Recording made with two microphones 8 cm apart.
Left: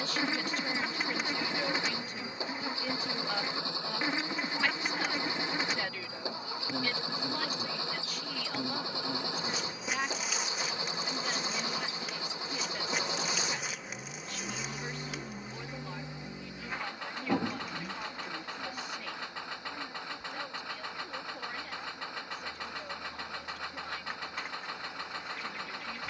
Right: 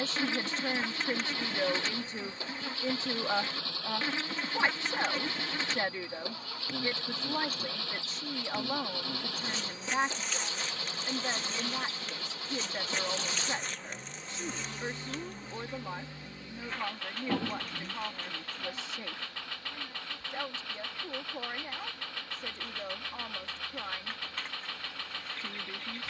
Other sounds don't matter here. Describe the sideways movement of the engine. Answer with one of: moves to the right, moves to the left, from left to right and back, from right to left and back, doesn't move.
doesn't move.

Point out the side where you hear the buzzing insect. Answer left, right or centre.
centre.